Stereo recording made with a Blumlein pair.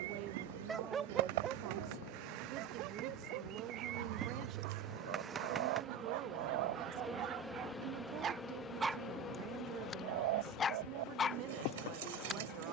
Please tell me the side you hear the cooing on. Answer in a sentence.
You can hear the cooing on the right.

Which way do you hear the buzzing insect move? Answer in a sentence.
In this clip you hear the buzzing insect move from right to left.